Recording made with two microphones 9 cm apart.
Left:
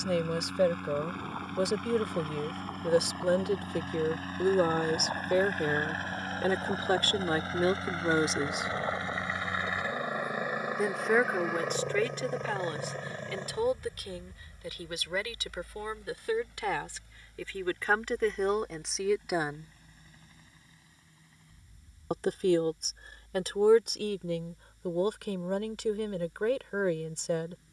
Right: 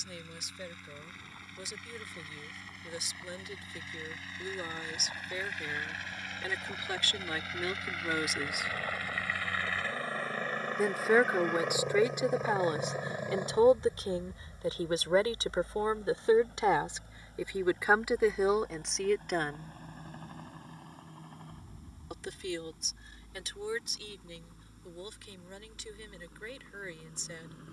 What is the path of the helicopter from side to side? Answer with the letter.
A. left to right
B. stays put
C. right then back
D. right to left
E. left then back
A.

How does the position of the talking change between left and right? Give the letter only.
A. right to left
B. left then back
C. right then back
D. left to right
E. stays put
C.